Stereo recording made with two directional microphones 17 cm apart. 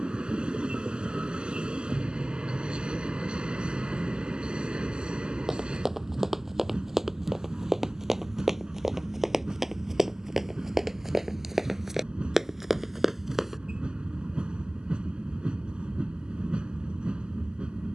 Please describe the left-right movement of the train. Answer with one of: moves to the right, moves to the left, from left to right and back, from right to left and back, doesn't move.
doesn't move.